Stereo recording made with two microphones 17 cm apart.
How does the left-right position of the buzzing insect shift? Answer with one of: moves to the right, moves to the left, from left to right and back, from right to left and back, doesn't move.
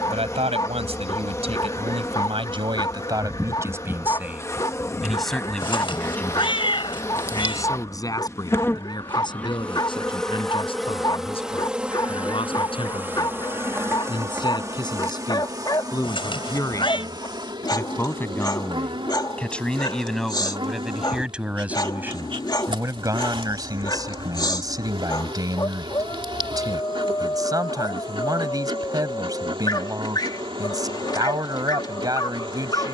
moves to the right.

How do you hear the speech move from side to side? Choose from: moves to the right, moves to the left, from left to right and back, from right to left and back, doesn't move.
from right to left and back.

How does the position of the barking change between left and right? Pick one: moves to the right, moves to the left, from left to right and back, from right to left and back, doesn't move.
doesn't move.